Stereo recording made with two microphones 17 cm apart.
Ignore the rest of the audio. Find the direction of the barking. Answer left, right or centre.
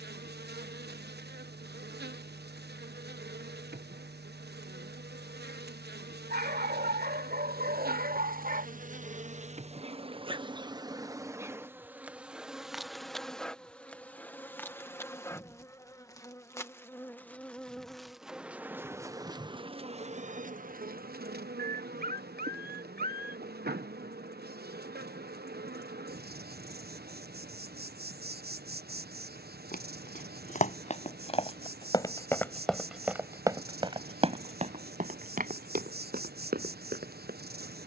right.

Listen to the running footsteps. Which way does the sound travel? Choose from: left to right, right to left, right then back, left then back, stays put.
left to right.